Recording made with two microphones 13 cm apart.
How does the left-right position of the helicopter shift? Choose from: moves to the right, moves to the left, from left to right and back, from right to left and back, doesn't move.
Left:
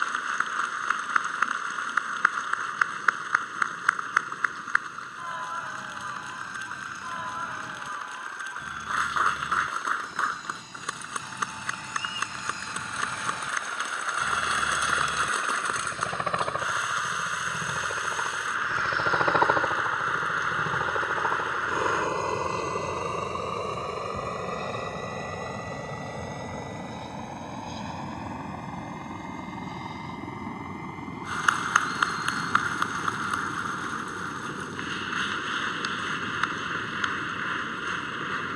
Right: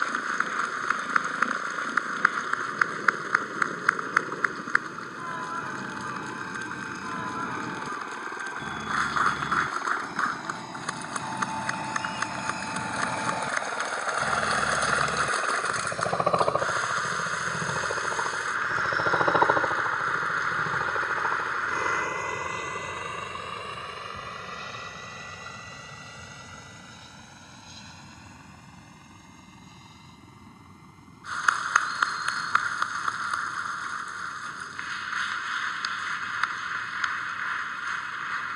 moves to the left.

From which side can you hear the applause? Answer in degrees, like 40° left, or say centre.
centre.